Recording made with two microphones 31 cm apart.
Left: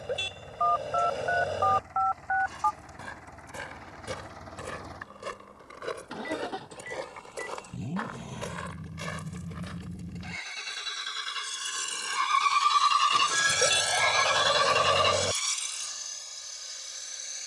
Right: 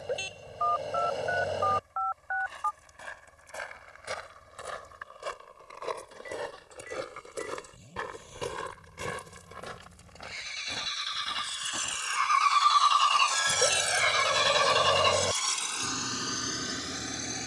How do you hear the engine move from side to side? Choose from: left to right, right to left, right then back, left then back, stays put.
left to right.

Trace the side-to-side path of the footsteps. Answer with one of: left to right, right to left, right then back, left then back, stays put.
left to right.